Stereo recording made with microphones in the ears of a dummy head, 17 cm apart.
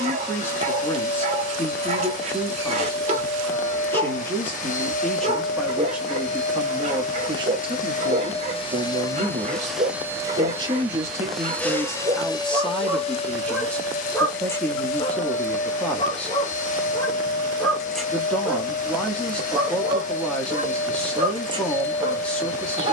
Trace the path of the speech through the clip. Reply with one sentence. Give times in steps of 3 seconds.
You can hear the speech in the centre from 0 s, on the right from 6 s and in the centre from 12 s.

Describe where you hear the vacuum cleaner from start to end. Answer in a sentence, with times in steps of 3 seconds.
You can hear the vacuum cleaner on the left from 0 s, in the centre from 9 s and on the left from 12 s.